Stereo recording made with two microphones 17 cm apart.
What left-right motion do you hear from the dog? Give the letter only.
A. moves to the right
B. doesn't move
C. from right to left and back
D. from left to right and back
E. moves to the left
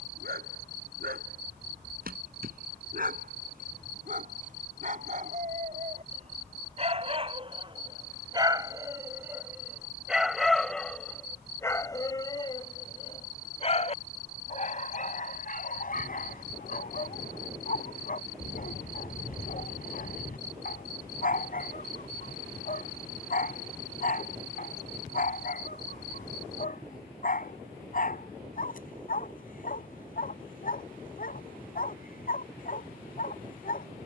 E.